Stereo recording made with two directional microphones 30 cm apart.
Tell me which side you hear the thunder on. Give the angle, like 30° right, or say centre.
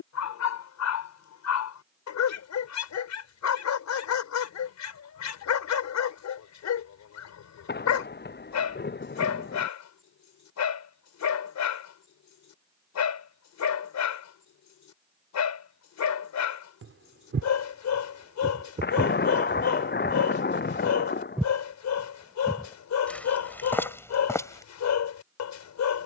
30° left.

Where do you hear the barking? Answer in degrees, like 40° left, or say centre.
60° left.